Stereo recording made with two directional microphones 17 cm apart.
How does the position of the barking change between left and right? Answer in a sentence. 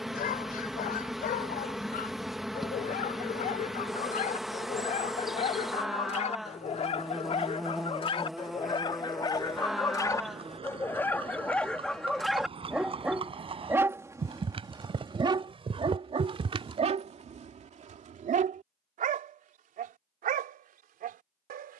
In this clip you hear the barking move from left to right.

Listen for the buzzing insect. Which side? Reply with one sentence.
You can hear the buzzing insect in the centre.